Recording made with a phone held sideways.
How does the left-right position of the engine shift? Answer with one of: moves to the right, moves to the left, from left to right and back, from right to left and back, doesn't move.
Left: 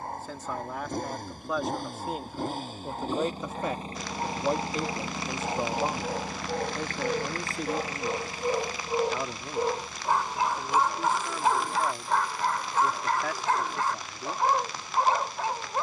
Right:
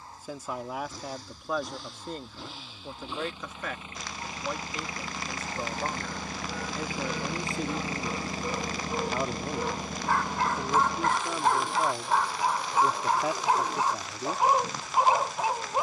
moves to the right.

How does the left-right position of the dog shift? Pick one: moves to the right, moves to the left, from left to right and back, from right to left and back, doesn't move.
moves to the right.